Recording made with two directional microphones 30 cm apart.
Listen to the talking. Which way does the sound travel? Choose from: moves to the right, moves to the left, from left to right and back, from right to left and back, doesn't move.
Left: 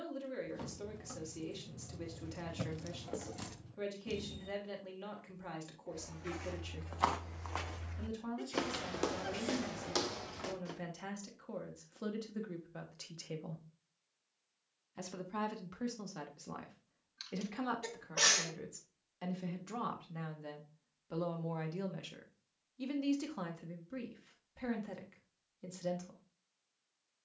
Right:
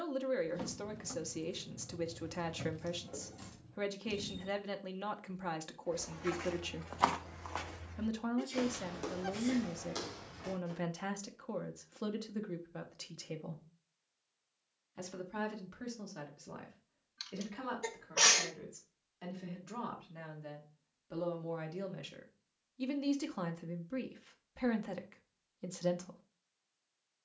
from right to left and back.